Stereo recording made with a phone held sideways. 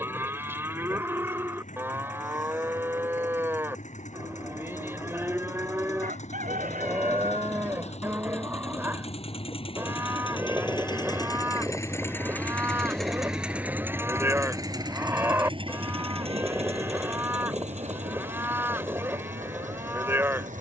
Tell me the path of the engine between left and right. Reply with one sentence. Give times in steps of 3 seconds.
In this clip you hear the engine on the left from 0 s, in the centre from 12 s and on the right from 15 s.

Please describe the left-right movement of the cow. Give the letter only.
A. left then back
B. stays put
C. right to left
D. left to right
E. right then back
B.